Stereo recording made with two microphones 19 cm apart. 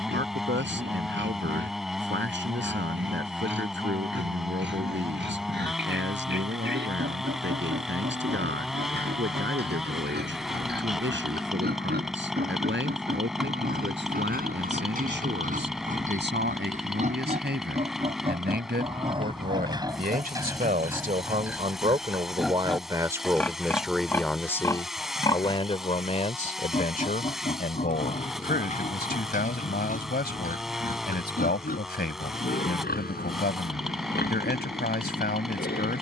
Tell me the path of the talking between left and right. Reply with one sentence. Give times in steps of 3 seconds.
You can hear the talking on the right from 0 s and on the left from 24 s.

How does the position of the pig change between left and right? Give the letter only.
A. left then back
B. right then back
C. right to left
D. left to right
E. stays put
C.